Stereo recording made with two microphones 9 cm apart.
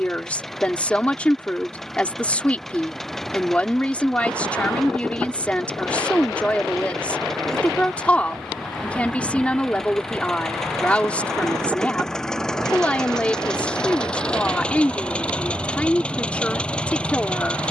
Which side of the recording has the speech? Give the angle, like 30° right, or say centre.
10° left.